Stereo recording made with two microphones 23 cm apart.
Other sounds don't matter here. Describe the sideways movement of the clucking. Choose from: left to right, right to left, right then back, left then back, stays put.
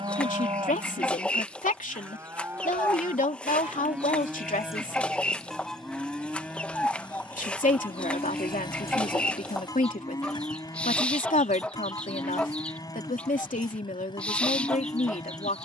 stays put.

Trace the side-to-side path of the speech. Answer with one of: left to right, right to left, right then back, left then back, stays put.
stays put.